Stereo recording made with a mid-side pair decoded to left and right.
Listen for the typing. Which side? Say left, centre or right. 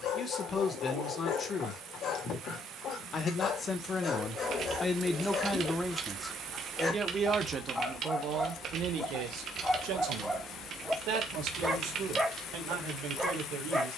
right.